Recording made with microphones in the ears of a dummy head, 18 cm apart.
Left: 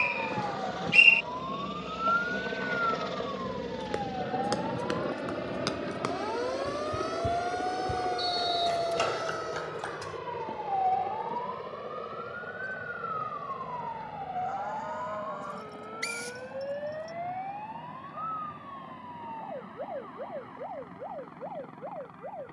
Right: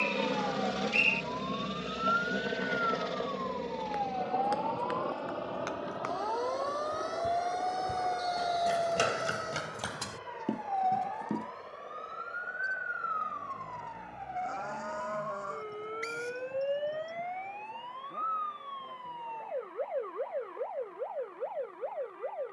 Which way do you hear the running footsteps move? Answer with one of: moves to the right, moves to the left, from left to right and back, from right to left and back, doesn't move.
moves to the right.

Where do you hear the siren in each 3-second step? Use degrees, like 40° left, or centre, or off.
40° left, 20° left, centre, 20° right, 30° right, 40° right, 50° right, 50° right.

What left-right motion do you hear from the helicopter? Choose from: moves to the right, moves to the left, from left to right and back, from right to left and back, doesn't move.
moves to the left.